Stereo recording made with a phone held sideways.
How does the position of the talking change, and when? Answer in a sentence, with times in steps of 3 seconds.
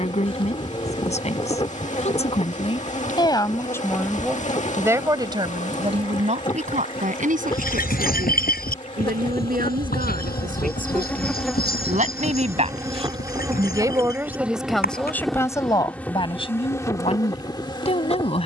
In this clip you hear the talking on the left from 0 s, in the centre from 3 s, on the right from 6 s and on the left from 15 s.